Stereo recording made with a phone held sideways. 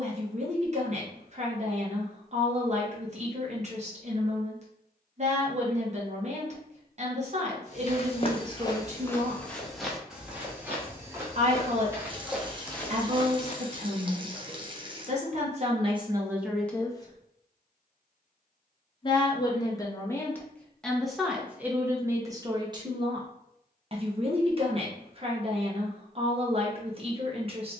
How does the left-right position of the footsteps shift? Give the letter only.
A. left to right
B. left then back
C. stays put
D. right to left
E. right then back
E.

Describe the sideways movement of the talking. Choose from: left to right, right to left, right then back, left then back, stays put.
left then back.